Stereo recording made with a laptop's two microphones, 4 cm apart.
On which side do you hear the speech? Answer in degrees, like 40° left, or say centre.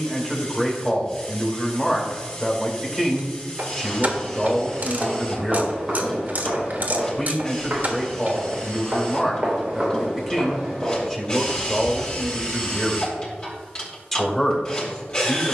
10° left.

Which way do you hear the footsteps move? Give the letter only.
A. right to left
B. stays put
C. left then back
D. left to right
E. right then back
E.